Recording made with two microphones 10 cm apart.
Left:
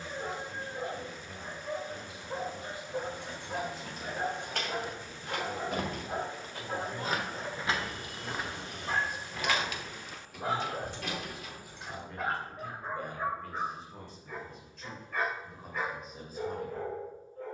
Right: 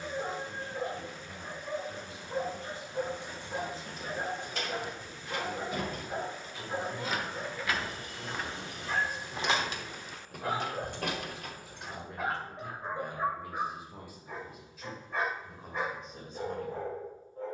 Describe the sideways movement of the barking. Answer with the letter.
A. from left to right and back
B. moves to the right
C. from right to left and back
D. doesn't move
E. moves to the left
C.